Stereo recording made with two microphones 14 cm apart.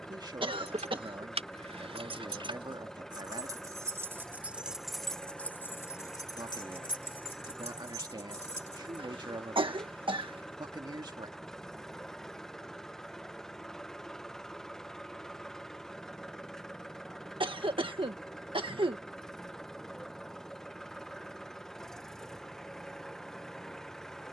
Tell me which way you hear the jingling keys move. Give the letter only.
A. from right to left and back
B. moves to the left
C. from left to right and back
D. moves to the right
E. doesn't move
B.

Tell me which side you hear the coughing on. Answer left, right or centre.
right.